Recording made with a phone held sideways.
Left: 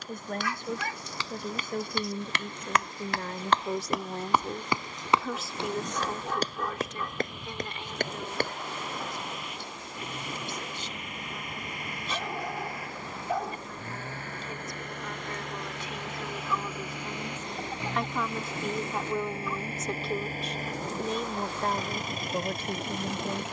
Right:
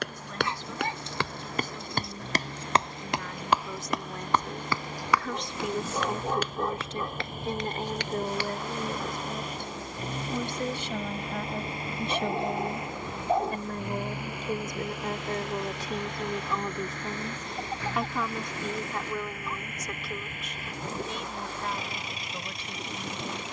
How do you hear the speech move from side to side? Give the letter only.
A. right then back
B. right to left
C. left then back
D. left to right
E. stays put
A.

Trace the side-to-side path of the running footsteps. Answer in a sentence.
In this clip you hear the running footsteps move to the left.